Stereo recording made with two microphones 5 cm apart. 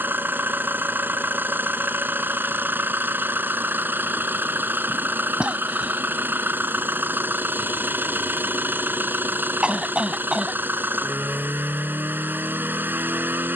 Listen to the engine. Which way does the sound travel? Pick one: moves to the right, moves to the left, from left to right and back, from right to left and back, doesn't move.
doesn't move.